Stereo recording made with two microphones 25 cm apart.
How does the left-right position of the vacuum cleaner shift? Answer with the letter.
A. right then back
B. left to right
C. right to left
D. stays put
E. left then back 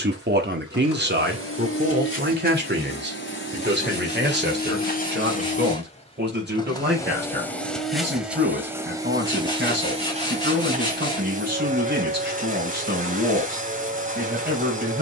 B.